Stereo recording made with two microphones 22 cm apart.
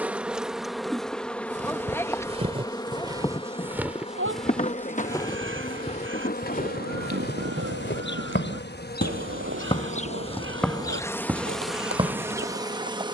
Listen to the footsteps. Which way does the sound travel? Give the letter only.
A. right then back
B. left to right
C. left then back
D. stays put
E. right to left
C.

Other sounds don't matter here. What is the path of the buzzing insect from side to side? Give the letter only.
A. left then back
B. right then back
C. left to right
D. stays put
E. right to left
A.